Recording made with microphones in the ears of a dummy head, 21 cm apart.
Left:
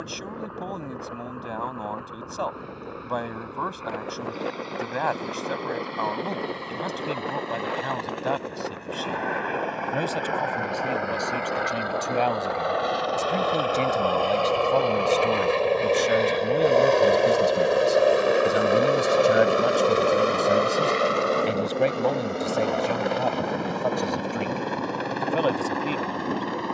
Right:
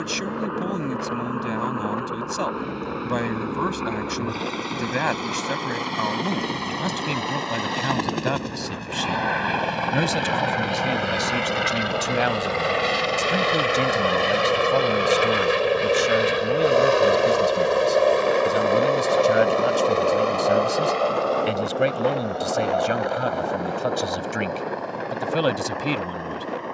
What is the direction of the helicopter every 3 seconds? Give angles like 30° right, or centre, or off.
70° right, 70° right, 60° right, 50° right, 30° right, 10° right, 20° left, 30° left, 50° left.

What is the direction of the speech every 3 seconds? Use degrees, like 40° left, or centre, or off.
30° right, 30° right, 30° right, 30° right, 10° right, centre, centre, 10° right, 30° right.